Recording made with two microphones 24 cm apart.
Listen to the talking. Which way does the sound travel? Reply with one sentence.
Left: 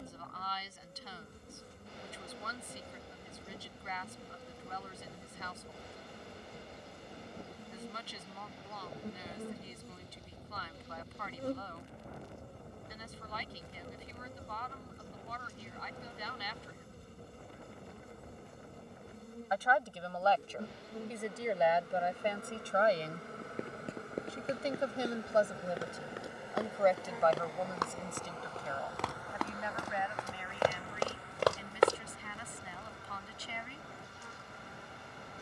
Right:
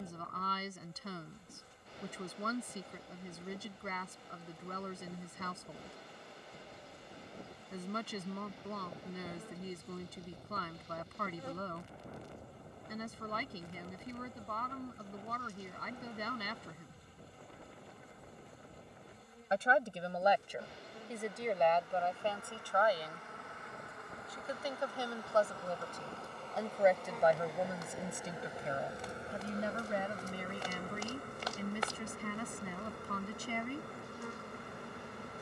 You can hear the talking go left and come back.